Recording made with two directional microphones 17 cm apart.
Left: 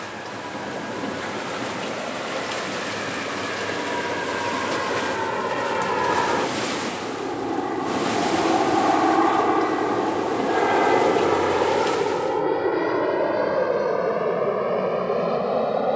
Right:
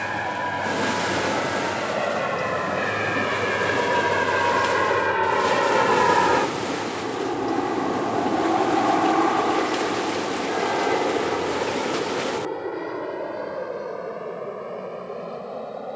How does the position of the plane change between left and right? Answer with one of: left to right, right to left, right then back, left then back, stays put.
right to left.